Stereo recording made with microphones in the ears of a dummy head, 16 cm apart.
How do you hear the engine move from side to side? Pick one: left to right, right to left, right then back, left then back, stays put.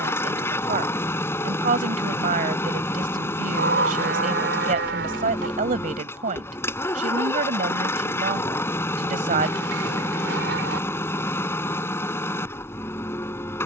stays put.